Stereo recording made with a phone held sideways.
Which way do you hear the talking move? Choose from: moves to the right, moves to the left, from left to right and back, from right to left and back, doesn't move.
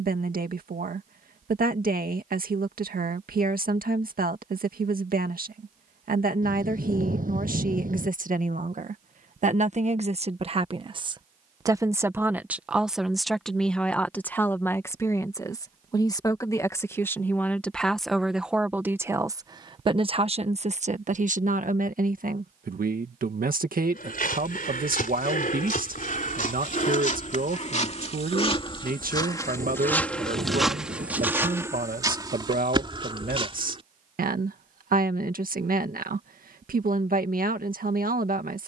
from right to left and back.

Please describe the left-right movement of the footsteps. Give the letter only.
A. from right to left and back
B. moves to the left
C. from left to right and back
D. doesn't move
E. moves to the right
E.